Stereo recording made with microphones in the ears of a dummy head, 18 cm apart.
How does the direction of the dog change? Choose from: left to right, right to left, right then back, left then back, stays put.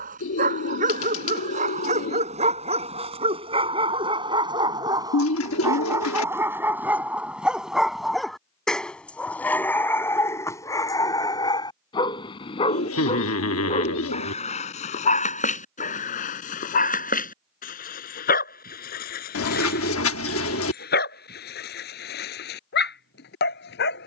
right to left.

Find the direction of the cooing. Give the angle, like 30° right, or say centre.
80° left.